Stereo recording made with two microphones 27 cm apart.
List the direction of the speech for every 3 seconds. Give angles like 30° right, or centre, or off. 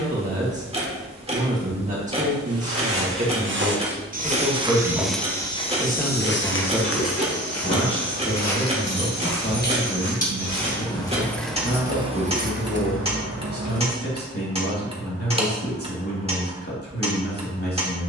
30° right, 10° right, 20° left, 40° left, 50° left, 50° left.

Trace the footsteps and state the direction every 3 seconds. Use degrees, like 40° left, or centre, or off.
50° right, 10° right, 60° left, 80° left, off, off.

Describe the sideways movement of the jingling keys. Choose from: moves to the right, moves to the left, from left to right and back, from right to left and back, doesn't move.
moves to the right.